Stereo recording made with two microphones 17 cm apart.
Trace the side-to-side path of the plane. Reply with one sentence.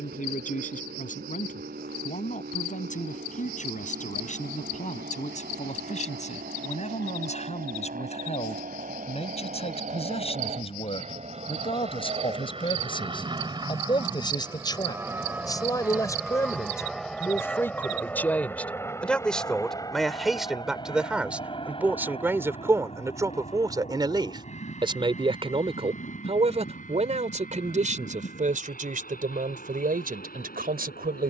You can hear the plane move from right to left.